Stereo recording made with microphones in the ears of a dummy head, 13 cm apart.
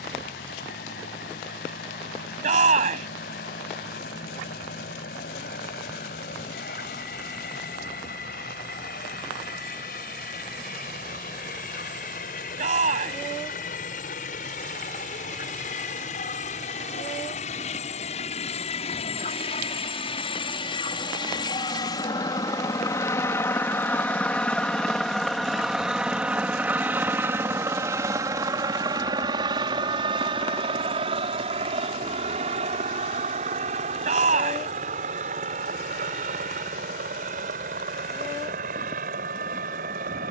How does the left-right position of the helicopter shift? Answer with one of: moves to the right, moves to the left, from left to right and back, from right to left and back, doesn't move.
moves to the right.